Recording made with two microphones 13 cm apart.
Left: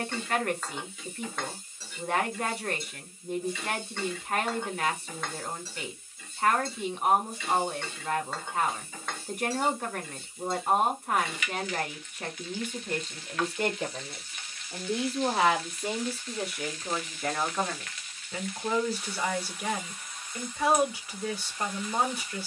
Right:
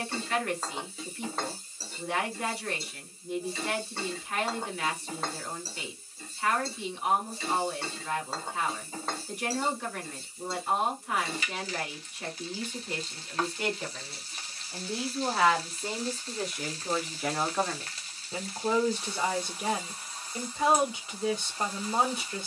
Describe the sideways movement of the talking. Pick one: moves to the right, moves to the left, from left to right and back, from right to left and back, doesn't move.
moves to the right.